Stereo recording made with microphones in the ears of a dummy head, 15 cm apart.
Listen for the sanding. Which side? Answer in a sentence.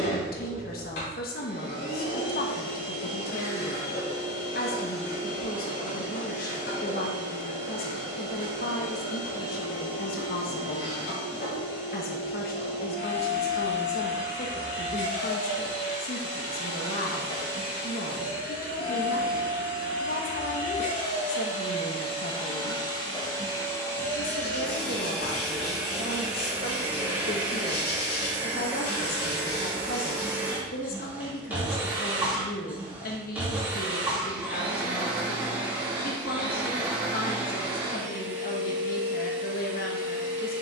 In this clip you hear the sanding on the left.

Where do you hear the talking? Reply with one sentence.
In this clip you hear the talking on the left.